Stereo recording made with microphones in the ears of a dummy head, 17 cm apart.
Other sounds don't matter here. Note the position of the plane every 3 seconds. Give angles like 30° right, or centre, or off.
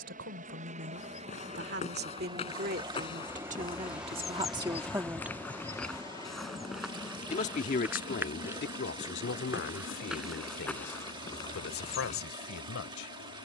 30° right, centre, 30° left, 40° left, 50° left.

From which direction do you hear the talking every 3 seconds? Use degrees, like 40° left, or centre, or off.
50° right, 30° right, 40° left, 60° left, 70° left.